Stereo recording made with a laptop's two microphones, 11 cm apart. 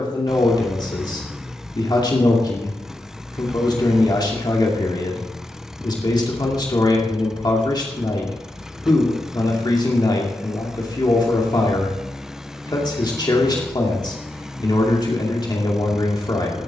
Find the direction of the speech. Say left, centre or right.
left.